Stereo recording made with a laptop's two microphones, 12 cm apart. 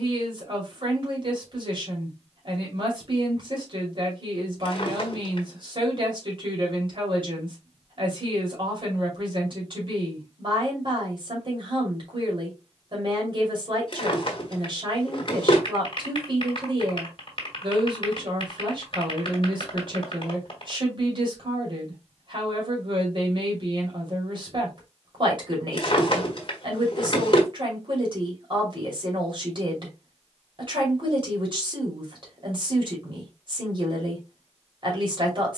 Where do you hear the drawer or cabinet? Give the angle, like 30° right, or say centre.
50° left.